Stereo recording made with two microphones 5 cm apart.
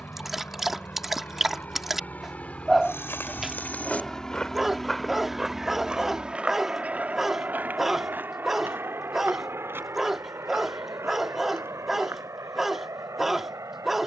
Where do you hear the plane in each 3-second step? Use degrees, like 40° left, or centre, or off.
40° left, 10° left, 30° right, 60° right, 70° right.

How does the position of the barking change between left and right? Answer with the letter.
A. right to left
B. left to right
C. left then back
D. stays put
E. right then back
D.